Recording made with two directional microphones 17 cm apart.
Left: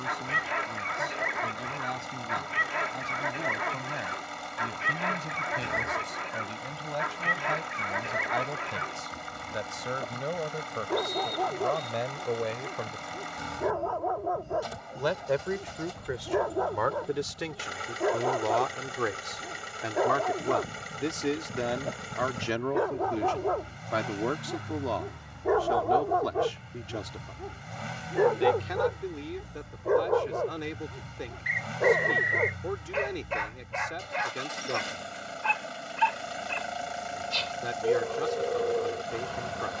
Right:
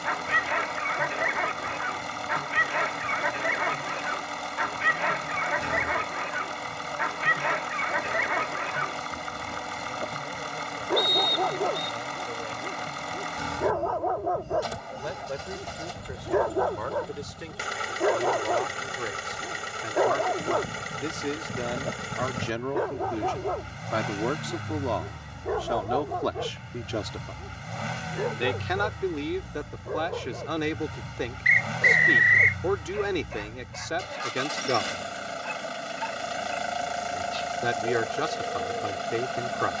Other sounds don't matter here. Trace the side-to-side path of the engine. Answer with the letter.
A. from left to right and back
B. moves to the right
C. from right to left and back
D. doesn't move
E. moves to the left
D.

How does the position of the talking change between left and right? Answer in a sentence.
You can hear the talking move from left to right.